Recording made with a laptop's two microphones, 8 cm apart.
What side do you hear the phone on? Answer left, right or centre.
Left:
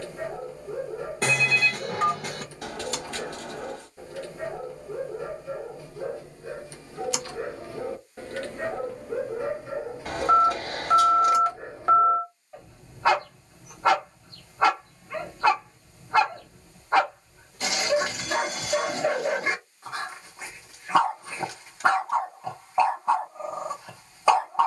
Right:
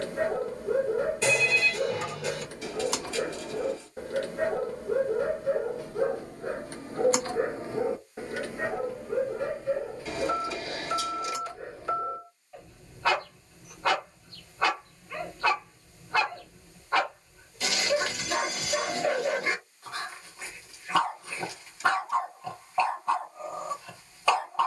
left.